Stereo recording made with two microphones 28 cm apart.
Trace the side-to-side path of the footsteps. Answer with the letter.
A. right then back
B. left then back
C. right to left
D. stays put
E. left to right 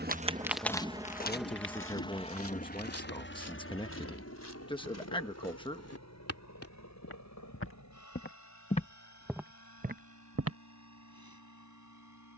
B.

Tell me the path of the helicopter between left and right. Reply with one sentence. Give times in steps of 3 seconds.
In this clip you hear the helicopter in the centre from 0 s and on the left from 3 s.